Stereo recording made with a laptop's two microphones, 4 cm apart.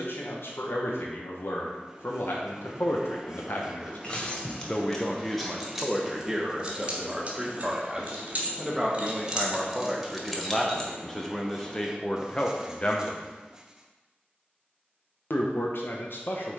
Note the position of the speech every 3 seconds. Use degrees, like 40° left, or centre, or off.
70° left, 30° left, 10° right, 10° left, 30° left, 60° left.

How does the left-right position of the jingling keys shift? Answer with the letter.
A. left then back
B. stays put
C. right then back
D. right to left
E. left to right
C.